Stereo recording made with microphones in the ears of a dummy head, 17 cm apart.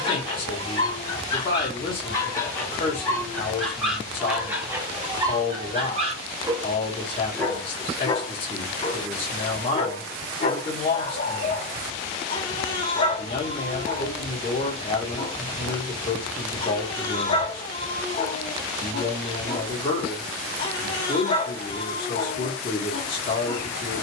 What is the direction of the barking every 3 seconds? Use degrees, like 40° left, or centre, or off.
20° left, 10° right, 10° left, 30° left, 30° left, 30° left, 30° left, 30° left.